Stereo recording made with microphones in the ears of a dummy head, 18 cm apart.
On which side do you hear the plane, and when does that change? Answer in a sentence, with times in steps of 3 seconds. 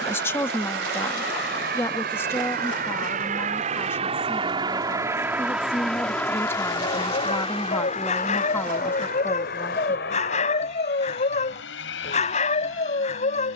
You can hear the plane on the right from 0 s and on the left from 6 s.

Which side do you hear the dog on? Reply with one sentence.
You can hear the dog on the left.